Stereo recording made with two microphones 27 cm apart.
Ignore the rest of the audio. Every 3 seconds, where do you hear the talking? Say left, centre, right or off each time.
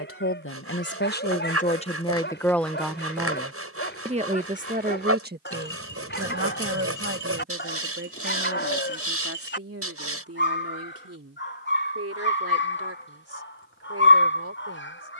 left, right, right, right, right.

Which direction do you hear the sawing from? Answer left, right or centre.
right.